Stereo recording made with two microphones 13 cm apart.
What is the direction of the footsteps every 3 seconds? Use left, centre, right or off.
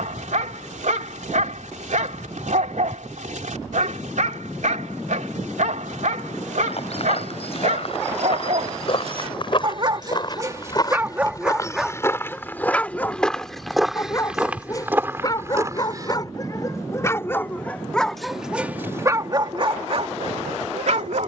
off, off, left, left, centre, right, off.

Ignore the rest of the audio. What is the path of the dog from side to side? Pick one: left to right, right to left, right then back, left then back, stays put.
left then back.